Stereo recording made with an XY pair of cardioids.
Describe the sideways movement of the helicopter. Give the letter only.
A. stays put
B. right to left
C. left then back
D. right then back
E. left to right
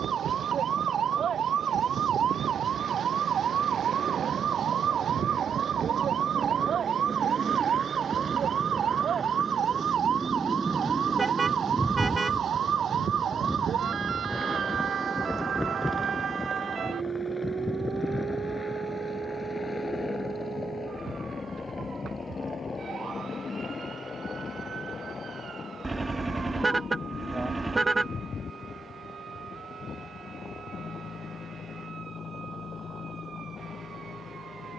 B.